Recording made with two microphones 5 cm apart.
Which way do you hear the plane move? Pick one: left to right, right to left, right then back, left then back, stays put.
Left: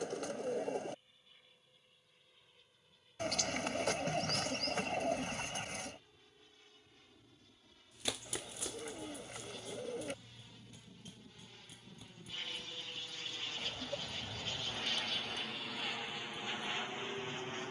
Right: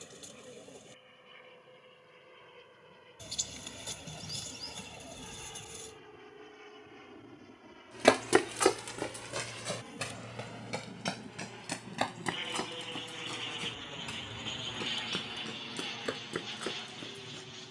right to left.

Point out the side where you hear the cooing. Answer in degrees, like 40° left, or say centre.
60° left.